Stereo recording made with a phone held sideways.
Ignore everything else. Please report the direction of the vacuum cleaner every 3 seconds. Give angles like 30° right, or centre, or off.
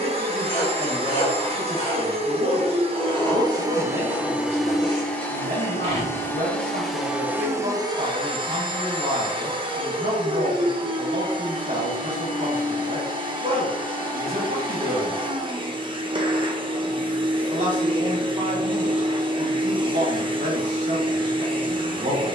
40° right, 10° right, 10° right, 30° right, 30° right, 30° right, 30° right, 30° right.